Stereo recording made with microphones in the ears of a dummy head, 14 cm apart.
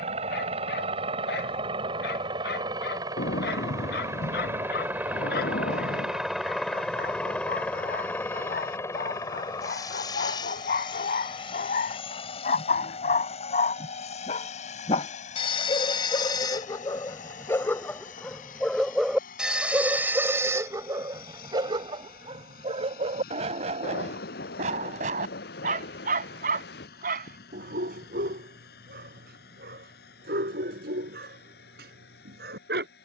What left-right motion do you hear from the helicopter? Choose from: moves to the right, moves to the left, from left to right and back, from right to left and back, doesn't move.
moves to the left.